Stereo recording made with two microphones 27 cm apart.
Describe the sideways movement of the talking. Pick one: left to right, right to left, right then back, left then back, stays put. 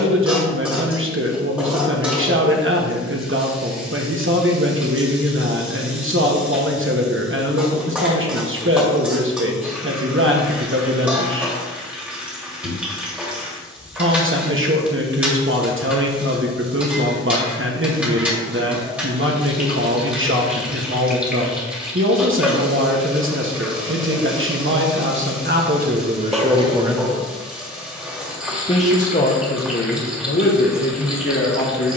right to left.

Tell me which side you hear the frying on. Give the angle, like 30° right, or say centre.
10° right.